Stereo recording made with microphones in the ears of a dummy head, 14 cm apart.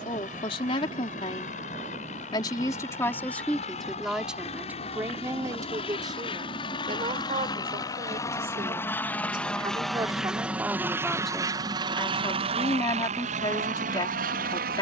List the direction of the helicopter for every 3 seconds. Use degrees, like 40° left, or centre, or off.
50° left, 40° left, 30° left, 10° right, 50° right.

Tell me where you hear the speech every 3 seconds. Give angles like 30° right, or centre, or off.
30° left, 10° right, 30° right, 10° right, 30° left.